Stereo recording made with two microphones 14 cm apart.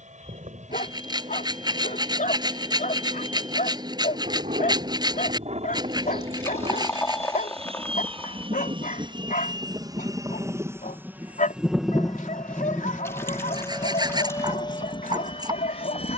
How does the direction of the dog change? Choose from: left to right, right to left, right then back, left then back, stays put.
stays put.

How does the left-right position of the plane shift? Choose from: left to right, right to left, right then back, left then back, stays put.
right to left.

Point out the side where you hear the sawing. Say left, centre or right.
right.